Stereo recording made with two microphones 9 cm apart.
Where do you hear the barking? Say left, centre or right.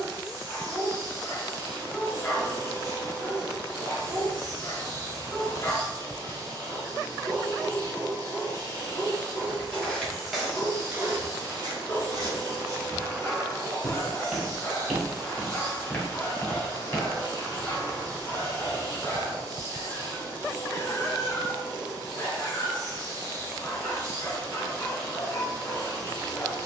left.